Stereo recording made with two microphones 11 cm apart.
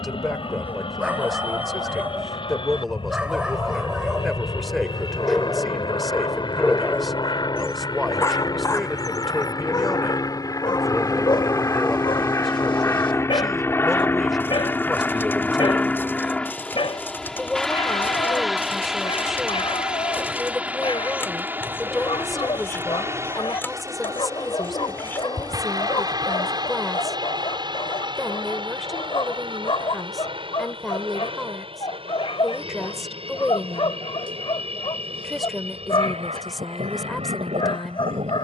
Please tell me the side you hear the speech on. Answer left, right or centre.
centre.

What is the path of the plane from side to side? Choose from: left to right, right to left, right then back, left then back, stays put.
left to right.